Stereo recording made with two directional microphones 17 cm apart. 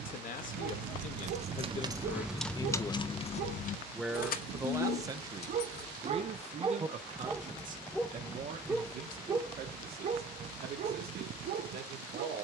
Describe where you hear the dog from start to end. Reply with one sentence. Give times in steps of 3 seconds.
You can hear the dog on the right from 0 s, in the centre from 6 s and on the right from 9 s.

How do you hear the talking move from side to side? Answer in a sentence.
You can hear the talking move from left to right.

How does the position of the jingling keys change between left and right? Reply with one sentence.
In this clip you hear the jingling keys travel towards the left.